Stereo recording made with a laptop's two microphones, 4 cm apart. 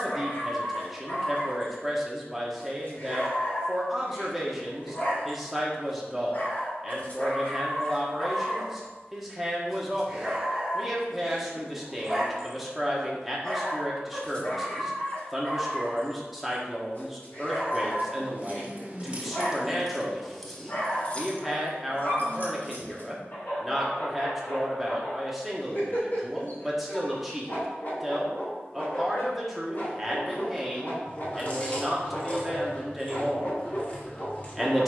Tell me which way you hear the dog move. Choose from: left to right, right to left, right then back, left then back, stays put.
right then back.